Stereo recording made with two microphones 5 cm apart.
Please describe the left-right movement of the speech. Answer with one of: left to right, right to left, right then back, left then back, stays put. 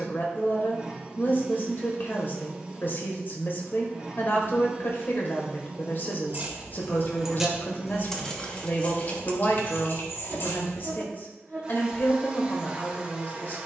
stays put.